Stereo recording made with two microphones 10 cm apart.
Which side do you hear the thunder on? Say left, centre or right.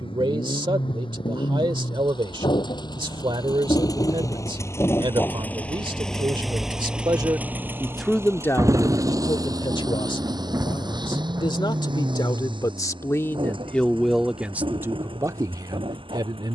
right.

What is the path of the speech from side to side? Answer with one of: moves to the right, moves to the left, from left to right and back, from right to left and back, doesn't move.
from right to left and back.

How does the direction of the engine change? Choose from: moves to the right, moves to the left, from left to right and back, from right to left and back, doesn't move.
moves to the right.